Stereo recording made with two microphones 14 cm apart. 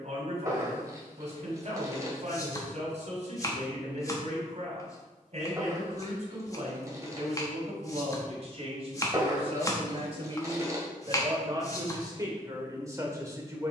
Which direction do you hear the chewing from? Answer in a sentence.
You can hear the chewing on the right.